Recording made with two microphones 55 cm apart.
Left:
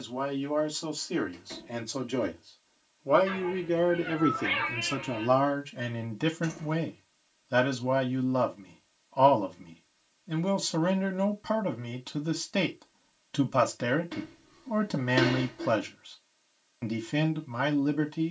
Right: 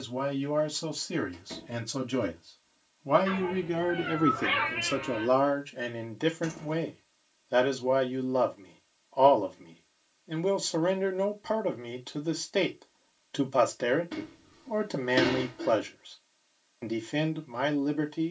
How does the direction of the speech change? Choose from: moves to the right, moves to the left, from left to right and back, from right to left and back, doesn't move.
moves to the left.